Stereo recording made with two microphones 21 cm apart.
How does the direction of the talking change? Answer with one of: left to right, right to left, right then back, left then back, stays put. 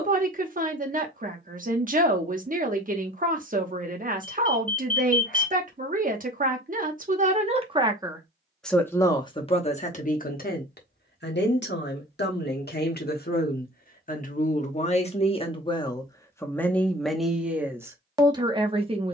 left then back.